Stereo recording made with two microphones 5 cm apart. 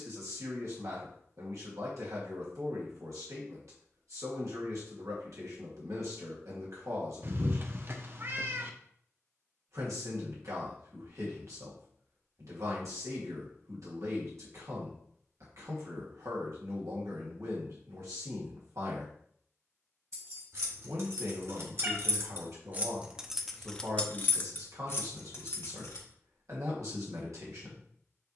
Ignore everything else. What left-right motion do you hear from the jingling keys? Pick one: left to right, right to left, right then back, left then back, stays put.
right to left.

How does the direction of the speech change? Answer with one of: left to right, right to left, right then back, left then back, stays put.
stays put.